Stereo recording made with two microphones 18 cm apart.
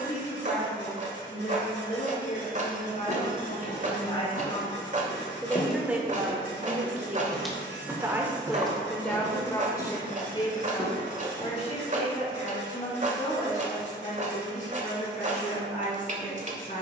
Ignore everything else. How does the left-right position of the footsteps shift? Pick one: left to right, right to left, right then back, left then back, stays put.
left to right.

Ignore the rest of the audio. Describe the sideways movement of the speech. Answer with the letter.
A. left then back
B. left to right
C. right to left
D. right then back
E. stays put
D.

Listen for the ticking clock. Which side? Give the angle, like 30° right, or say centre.
40° right.